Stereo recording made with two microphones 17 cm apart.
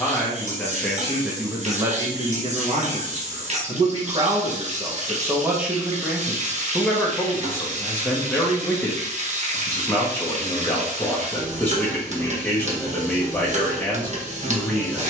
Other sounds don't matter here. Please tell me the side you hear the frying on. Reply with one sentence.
In this clip you hear the frying on the right.